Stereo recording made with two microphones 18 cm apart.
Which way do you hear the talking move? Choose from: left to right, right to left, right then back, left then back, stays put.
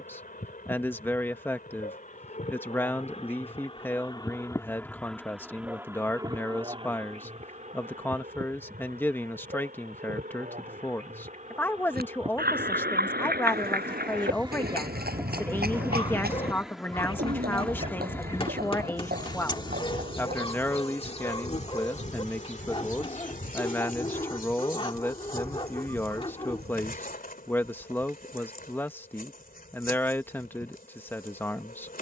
stays put.